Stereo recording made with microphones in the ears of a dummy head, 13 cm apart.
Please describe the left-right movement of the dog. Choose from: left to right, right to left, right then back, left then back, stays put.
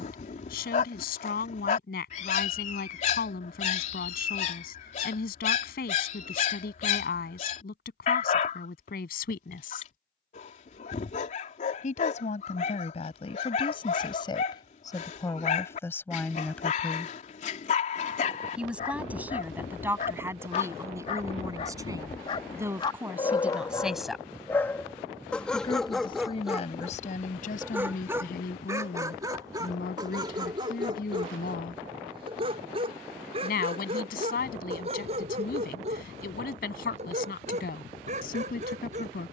left to right.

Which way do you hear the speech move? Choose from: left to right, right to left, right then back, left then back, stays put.
right then back.